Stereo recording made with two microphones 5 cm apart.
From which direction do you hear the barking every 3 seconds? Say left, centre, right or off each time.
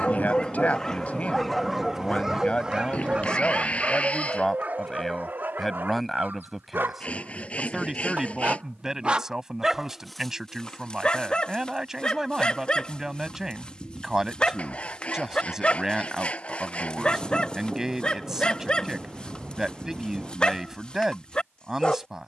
centre, right, right, centre, left, left, left, left.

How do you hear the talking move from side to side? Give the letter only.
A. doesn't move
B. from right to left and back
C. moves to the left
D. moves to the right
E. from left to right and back
D.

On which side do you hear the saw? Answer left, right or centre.
left.